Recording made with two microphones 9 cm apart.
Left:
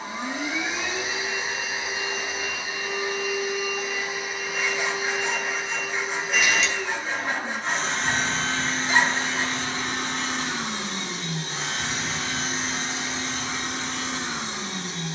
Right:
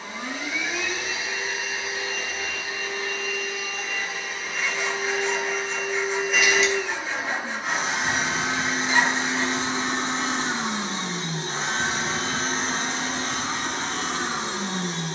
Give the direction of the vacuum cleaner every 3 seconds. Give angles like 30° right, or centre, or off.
30° left, 10° left, 10° right, 30° right, 50° right.